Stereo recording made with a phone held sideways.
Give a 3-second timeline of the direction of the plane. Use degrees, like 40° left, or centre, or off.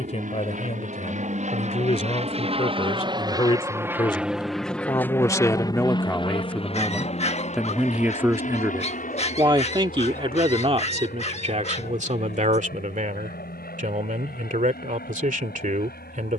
60° right, centre, 40° left, 60° left, 70° left, 70° left.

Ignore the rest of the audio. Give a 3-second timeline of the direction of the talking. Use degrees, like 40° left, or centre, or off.
40° left, 30° left, centre, 40° right, 60° right, 60° right.